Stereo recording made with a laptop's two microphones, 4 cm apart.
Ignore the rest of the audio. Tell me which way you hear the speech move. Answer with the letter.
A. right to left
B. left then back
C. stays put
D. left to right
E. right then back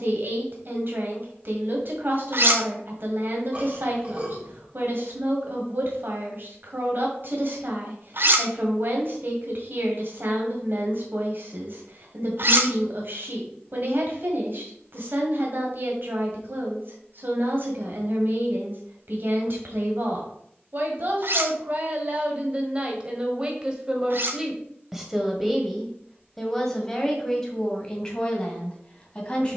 A.